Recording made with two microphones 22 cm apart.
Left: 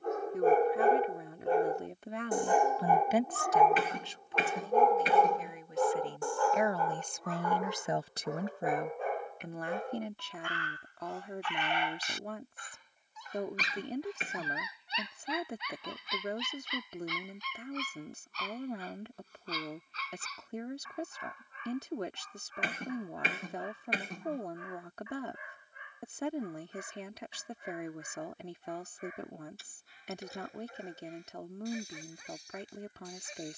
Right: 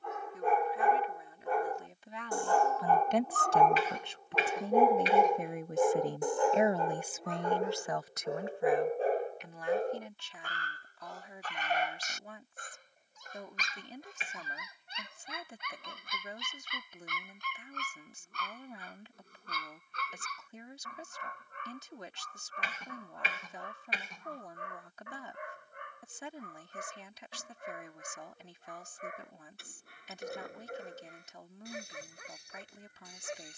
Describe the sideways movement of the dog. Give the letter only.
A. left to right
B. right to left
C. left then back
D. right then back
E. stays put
A.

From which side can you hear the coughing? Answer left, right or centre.
left.